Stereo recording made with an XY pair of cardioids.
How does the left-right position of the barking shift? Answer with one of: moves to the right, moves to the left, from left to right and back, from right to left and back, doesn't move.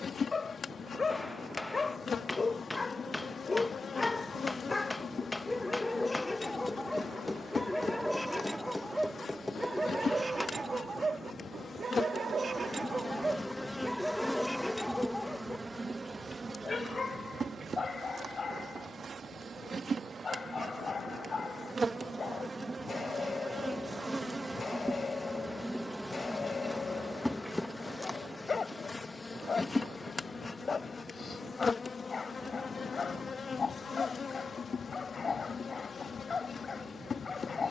from left to right and back.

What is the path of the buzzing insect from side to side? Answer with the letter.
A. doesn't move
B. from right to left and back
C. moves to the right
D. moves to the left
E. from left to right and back
E.